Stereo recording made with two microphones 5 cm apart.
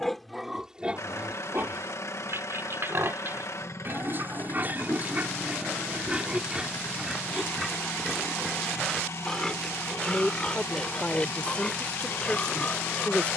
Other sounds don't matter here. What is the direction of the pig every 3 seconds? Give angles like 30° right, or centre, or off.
30° right, 40° right, 10° right, 20° left, 30° left.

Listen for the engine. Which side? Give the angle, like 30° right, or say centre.
80° left.